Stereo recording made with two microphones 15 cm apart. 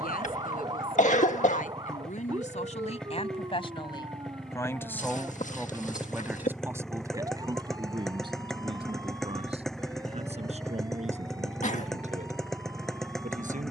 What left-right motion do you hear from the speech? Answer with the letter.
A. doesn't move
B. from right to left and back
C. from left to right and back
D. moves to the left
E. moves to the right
E.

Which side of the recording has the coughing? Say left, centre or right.
left.